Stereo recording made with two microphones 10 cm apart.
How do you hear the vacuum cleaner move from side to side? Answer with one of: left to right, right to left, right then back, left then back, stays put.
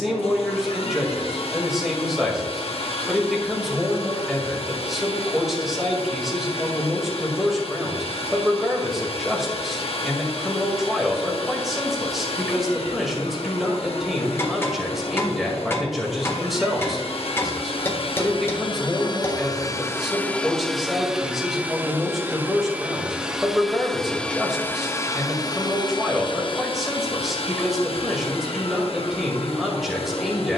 right then back.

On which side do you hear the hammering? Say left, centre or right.
left.